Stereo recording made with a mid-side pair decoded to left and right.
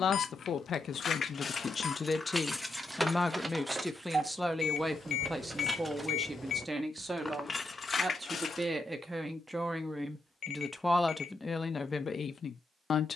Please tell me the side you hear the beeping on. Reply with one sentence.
In this clip you hear the beeping on the left.